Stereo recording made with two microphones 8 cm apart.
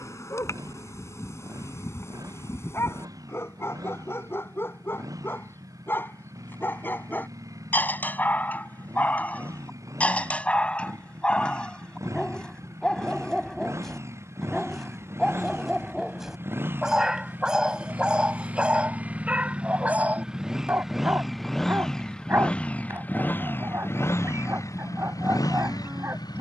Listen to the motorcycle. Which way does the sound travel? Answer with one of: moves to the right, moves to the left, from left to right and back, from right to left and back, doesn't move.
moves to the left.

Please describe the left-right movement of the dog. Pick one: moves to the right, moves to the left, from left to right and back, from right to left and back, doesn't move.
moves to the right.